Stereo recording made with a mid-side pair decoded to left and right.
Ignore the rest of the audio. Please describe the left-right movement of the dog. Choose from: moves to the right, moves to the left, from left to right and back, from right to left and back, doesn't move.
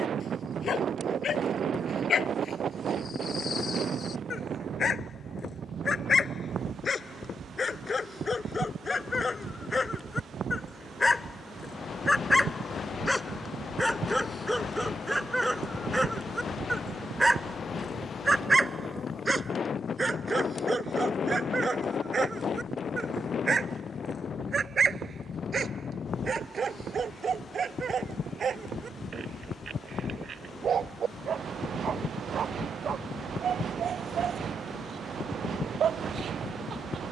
moves to the right.